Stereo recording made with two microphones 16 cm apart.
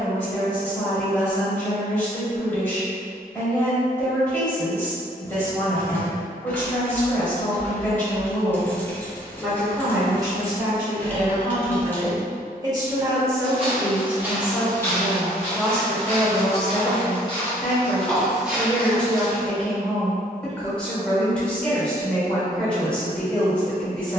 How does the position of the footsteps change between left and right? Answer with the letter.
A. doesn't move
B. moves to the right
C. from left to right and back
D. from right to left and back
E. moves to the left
D.